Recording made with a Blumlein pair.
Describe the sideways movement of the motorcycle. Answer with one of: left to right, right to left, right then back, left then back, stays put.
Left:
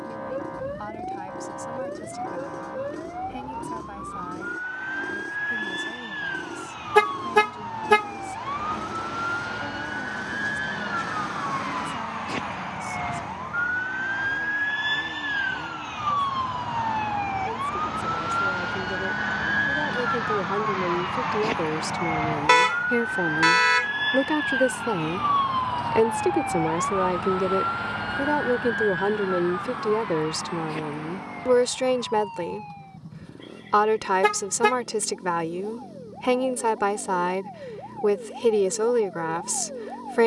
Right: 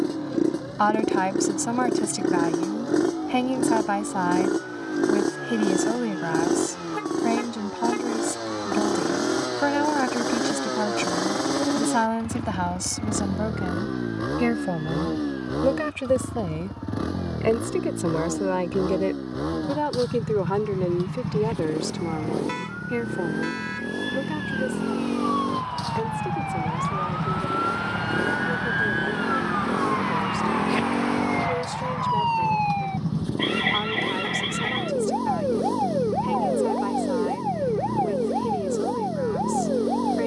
stays put.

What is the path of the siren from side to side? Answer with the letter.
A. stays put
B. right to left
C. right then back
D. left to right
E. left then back
D.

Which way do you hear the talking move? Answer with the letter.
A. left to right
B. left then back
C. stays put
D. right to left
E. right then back
D.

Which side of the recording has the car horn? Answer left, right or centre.
left.